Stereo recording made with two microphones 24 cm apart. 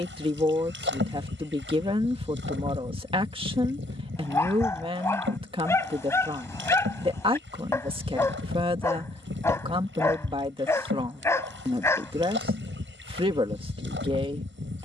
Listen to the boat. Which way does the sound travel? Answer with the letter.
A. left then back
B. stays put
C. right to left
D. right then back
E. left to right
B.